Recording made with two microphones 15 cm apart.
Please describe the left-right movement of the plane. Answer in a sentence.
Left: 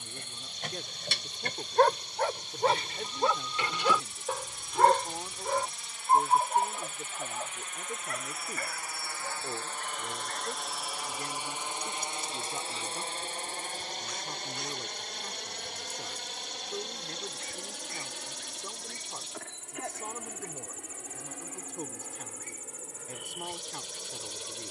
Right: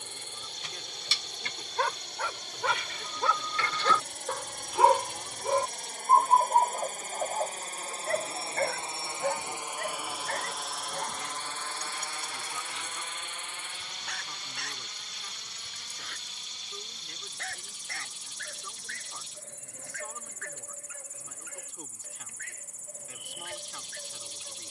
In this clip you hear the plane move from right to left.